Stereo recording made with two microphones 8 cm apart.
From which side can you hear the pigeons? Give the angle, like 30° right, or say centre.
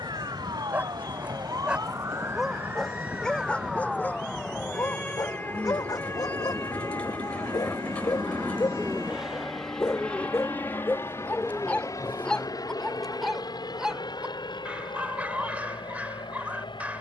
20° left.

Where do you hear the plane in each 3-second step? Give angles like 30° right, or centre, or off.
70° right, 60° right, 30° right, 20° left, 50° left, 70° left.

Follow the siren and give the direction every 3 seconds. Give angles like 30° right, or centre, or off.
40° right, 10° left, 40° left, 50° left, 60° left, 60° left.